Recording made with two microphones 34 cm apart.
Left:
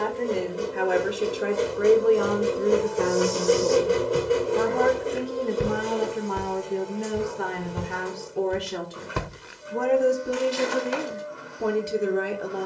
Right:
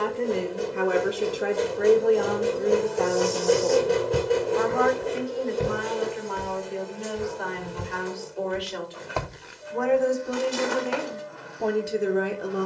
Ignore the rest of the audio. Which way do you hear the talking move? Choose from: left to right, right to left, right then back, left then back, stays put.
left then back.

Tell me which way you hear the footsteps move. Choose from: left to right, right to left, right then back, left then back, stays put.
left then back.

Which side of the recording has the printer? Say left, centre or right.
centre.